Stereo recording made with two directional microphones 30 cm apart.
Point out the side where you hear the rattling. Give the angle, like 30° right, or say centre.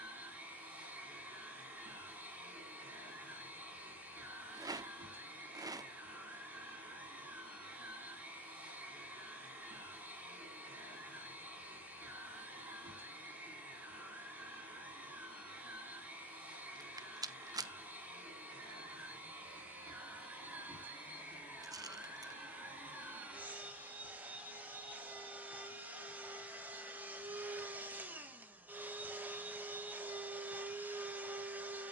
10° right.